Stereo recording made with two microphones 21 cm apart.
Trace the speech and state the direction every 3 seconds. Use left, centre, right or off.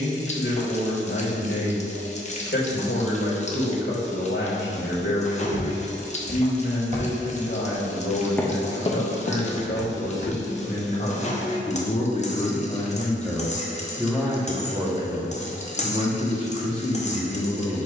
left, left, left, left, centre, right.